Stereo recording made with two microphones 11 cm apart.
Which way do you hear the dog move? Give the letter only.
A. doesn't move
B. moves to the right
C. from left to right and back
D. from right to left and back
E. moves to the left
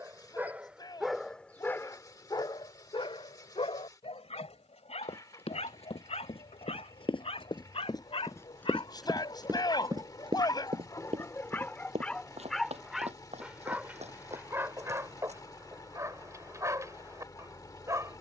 D.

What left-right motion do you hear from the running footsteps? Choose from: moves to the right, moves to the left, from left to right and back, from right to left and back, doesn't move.
moves to the right.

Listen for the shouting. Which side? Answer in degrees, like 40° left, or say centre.
40° left.